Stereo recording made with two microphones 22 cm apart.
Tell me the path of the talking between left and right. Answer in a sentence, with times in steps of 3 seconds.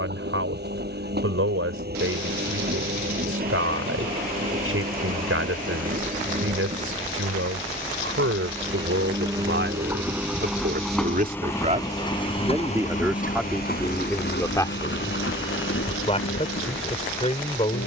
You can hear the talking on the right from 0 s, in the centre from 12 s and on the left from 15 s.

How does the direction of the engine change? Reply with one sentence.
You can hear the engine move to the left.